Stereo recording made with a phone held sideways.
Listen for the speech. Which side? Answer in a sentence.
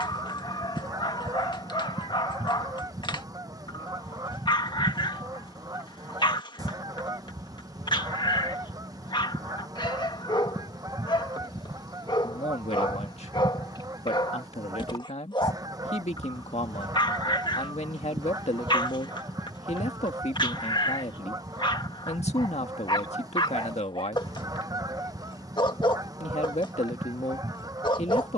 In this clip you hear the speech on the left.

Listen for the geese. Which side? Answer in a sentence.
You can hear the geese on the right.